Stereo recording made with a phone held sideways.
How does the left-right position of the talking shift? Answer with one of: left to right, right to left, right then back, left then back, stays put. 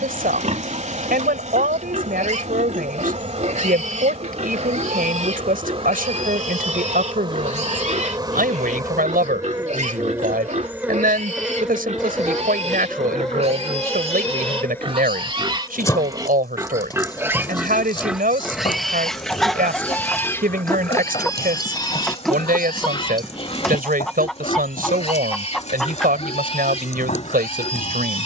stays put.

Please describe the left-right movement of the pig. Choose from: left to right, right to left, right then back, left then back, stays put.
right to left.